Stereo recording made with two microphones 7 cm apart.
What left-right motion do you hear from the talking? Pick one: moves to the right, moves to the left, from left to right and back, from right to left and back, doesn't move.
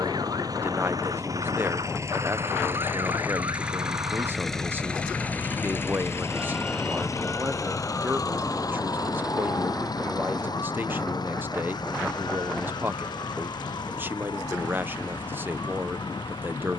doesn't move.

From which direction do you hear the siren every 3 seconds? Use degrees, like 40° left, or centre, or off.
70° right, 40° right, 30° left, 60° left, 70° left, 70° left.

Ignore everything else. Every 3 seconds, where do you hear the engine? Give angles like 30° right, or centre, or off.
50° right, centre, 50° left, 60° left, 70° left, 80° left.